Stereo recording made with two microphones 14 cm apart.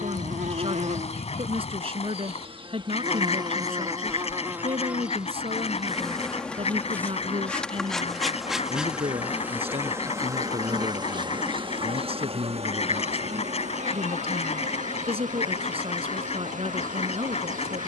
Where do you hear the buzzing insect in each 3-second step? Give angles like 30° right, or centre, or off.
50° right, 20° right, centre, 30° right, 60° right, 70° right.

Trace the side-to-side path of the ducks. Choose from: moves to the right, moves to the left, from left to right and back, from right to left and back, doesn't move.
doesn't move.